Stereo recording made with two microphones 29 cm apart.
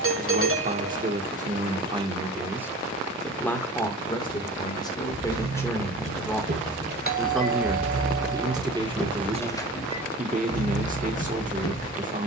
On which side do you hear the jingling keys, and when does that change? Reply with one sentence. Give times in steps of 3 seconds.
You can hear the jingling keys not at all from 0 s, on the right from 3 s and on the left from 9 s.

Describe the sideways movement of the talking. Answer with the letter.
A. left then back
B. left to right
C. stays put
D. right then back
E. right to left
A.